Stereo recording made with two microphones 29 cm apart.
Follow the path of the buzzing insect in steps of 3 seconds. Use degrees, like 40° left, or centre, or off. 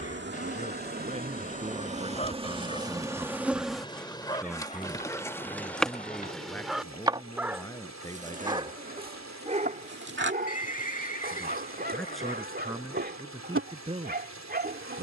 30° right, centre, 20° right, 40° right, 50° right.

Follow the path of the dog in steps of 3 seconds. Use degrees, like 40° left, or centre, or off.
30° left, 10° left, centre, 30° right, 40° right.